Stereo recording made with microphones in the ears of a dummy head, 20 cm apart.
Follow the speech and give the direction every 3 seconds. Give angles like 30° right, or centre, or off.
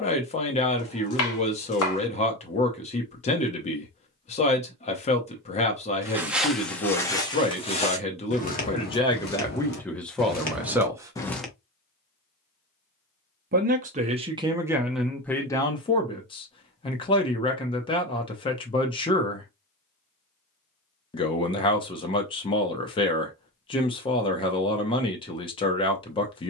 30° left, 30° left, 30° left, centre, 20° right, 20° left, 20° left, 20° left, 20° left.